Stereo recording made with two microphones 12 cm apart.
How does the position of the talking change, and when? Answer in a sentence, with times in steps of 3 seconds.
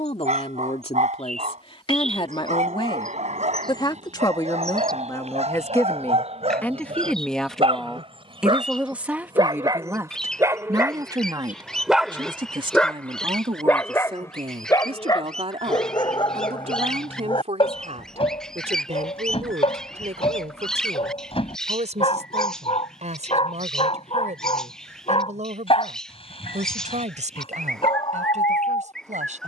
In this clip you hear the talking on the left from 0 s, in the centre from 6 s and on the right from 9 s.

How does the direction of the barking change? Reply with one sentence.
In this clip you hear the barking move to the left.